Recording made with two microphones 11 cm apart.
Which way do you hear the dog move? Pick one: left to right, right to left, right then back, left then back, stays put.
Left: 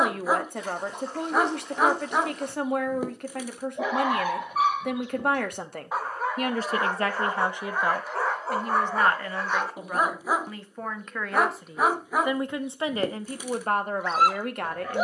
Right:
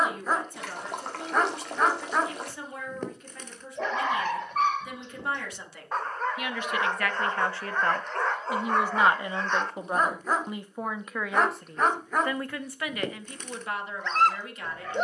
stays put.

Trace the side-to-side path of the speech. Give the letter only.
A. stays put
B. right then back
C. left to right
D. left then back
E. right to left
B.